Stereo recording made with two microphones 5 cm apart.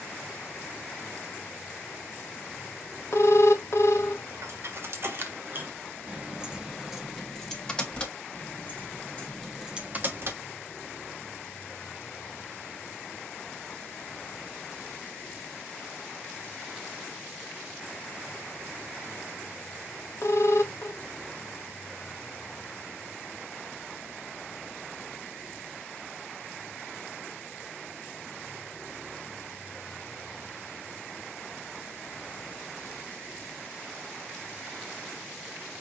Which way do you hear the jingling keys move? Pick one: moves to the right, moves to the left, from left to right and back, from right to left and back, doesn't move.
from right to left and back.